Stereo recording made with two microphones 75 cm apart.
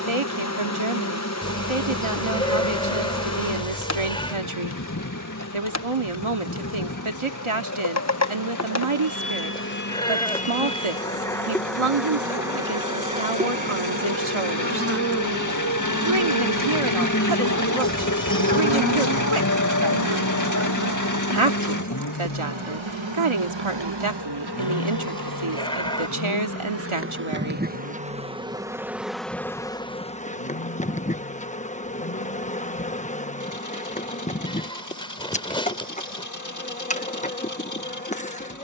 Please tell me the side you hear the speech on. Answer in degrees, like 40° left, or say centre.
40° right.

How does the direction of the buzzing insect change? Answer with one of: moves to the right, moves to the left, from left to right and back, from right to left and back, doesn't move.
from left to right and back.